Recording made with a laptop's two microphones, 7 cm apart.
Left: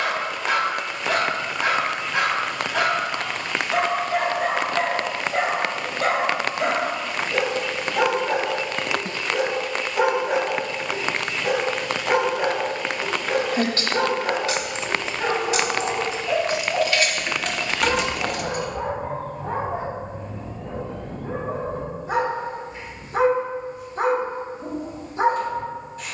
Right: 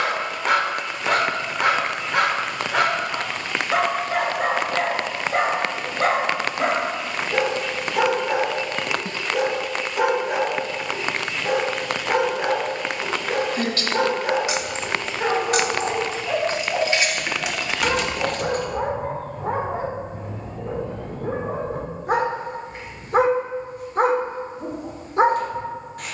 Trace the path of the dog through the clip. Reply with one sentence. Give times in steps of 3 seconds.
You can hear the dog on the right from 0 s, in the centre from 9 s and on the right from 15 s.